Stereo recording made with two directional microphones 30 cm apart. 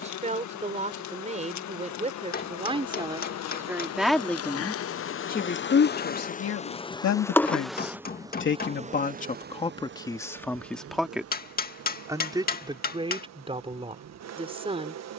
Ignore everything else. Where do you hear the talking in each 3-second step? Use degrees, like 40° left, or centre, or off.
20° right, 10° left, 50° left, 10° left, 20° right.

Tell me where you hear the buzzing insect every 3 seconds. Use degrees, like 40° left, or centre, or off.
70° left, 50° left, centre, 40° right, 60° right.